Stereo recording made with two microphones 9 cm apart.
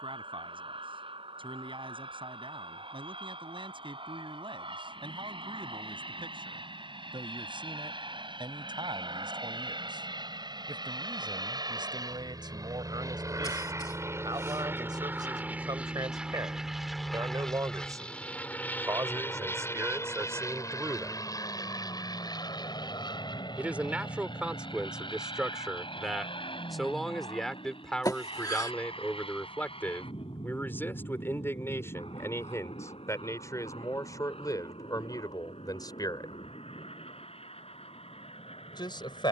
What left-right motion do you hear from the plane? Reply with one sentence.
You can hear the plane move from right to left.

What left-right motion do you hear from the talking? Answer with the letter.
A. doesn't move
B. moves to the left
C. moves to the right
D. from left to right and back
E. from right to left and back
B.